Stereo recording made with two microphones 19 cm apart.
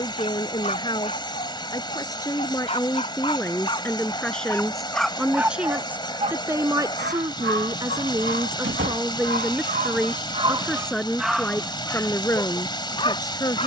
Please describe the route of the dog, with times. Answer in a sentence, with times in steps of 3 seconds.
You can hear the dog on the left from 0 s, in the centre from 3 s, on the right from 6 s and on the left from 12 s.